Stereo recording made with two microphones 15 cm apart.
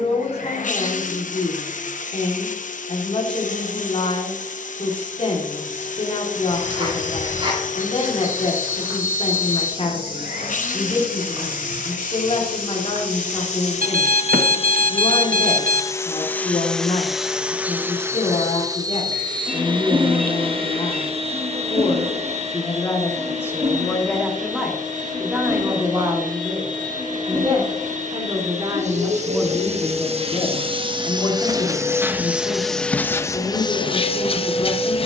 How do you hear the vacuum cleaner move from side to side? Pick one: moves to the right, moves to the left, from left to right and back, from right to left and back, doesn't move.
from left to right and back.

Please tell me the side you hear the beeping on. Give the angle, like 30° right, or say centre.
70° right.